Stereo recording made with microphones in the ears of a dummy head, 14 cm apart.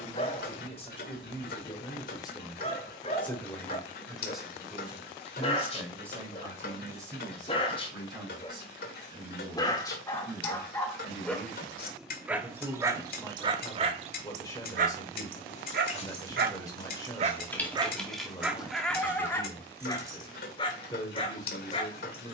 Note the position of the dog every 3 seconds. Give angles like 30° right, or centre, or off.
40° left, 40° left, 40° left, 20° left, 30° right, 50° right, 20° left, 40° left.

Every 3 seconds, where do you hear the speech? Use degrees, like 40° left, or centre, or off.
30° left, centre, 20° right, 20° right, 20° left, 20° left, 20° left, 20° left.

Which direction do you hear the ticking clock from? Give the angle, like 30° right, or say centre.
60° left.